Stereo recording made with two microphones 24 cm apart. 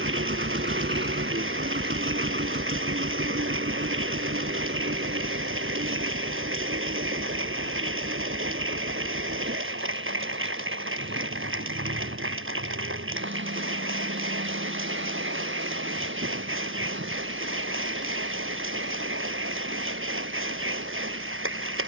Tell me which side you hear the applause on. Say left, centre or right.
right.